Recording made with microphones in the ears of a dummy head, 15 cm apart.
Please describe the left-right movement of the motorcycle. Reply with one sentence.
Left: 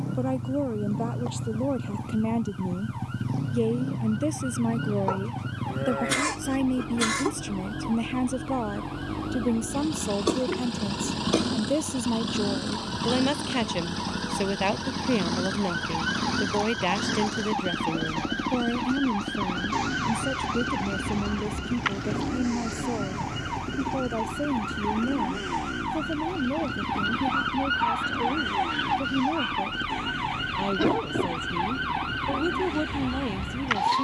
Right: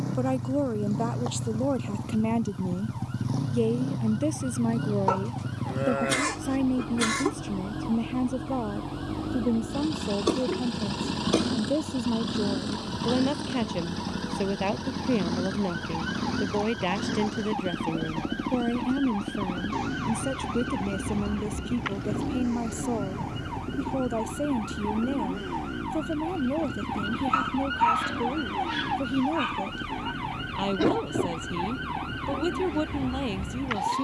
In this clip you hear the motorcycle go from the right side to the left.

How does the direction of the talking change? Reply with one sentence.
In this clip you hear the talking go left and come back.